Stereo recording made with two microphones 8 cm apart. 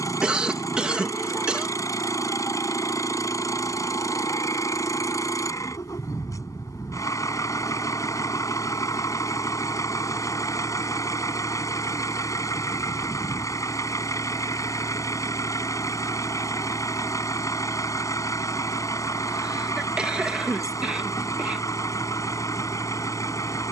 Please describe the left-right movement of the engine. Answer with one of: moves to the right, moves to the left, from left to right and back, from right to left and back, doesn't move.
doesn't move.